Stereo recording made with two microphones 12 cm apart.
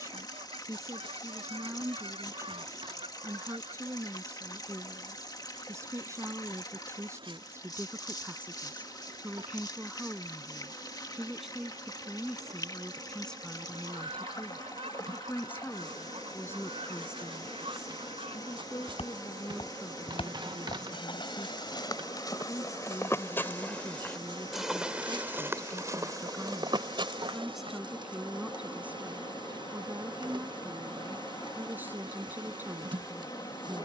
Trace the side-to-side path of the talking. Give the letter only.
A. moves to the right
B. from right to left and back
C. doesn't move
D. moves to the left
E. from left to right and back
B.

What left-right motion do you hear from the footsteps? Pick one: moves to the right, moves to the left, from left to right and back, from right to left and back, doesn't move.
moves to the right.